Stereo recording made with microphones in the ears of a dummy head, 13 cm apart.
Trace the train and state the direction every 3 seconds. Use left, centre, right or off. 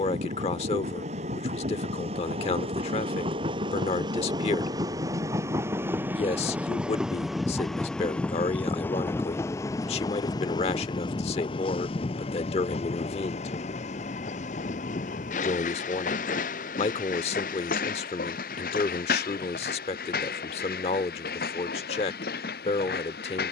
right, right, centre, left, left, left, left, left.